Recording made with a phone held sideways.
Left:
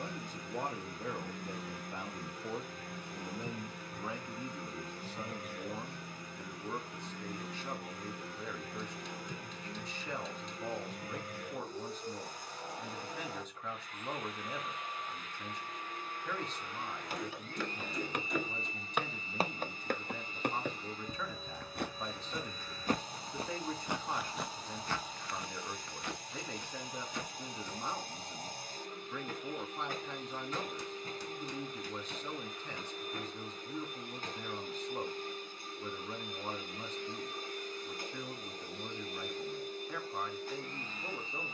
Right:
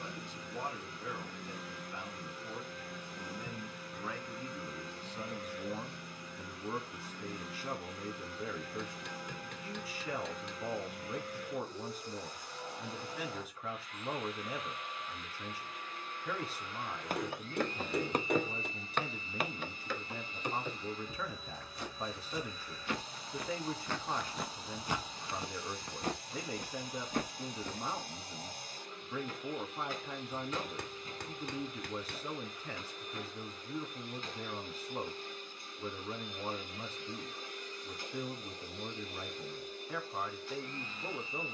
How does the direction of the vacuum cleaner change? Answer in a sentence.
In this clip you hear the vacuum cleaner stay in one place.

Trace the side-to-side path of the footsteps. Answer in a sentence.
You can hear the footsteps move from right to left and back again.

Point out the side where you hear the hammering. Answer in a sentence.
In this clip you hear the hammering on the right.